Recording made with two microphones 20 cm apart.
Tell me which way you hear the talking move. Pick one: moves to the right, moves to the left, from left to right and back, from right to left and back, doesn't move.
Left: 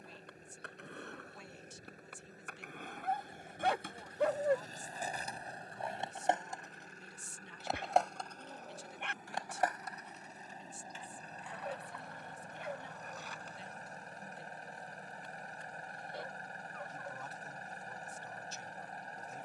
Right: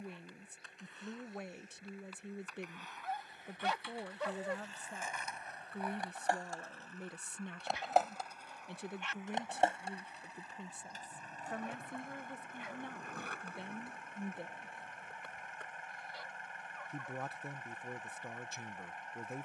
doesn't move.